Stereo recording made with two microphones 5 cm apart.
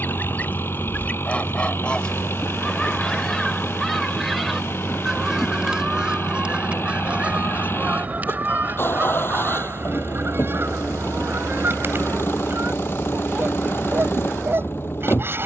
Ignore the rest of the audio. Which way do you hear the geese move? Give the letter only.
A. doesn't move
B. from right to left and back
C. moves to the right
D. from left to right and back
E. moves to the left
C.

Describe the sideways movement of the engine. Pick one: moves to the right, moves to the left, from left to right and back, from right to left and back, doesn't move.
doesn't move.